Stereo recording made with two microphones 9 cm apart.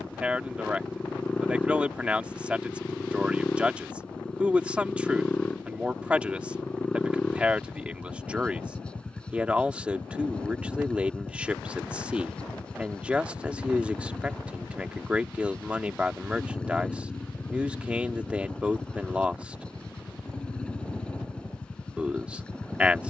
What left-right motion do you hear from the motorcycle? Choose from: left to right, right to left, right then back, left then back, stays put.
stays put.